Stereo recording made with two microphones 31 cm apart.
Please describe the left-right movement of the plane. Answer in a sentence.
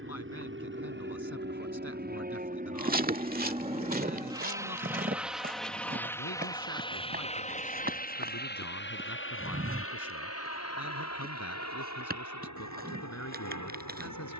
In this clip you hear the plane travel towards the left.